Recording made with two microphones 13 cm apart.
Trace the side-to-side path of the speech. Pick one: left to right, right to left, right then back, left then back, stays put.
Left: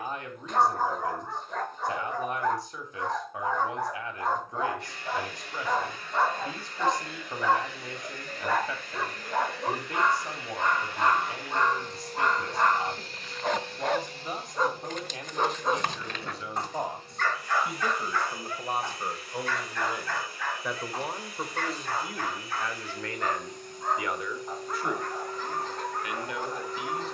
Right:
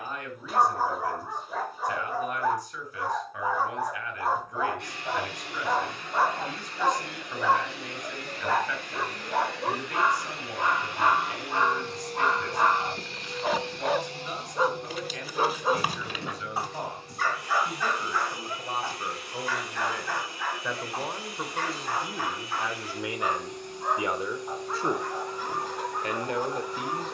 left to right.